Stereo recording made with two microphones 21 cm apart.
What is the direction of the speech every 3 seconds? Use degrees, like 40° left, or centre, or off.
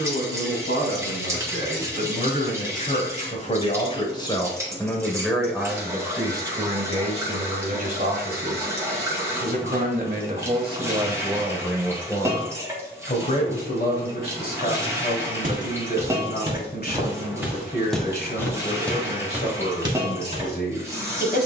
50° left, 20° left, 30° right, 20° right, 40° left, 50° left, 50° left.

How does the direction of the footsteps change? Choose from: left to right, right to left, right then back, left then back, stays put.
left then back.